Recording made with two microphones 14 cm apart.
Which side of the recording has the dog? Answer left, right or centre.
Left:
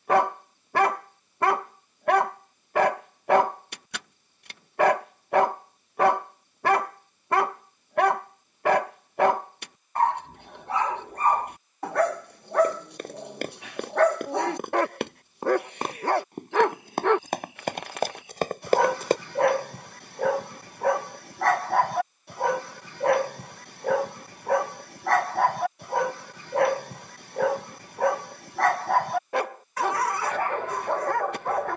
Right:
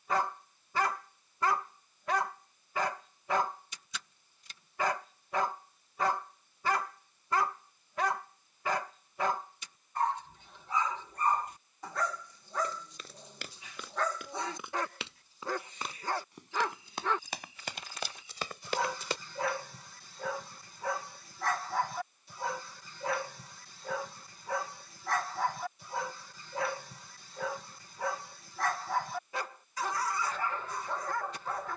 left.